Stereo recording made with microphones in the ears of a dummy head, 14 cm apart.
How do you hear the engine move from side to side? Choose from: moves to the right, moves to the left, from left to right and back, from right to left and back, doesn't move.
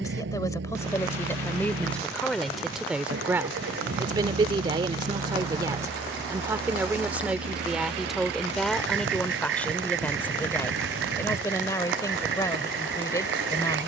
doesn't move.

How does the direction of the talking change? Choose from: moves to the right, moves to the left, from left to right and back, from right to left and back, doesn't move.
from left to right and back.